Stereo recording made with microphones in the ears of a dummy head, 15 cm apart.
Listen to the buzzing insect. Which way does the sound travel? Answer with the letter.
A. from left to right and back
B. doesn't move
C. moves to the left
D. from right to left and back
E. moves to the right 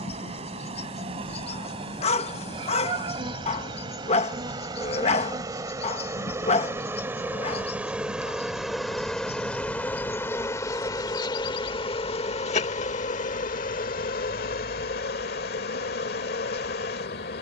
C.